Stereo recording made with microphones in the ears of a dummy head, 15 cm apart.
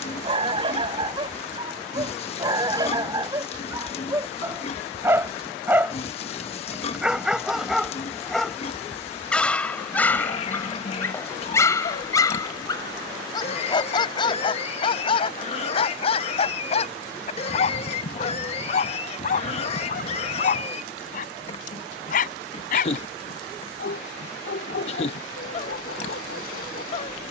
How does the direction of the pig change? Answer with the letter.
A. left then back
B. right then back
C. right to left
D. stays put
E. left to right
D.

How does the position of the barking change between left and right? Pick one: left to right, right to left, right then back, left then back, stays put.
right to left.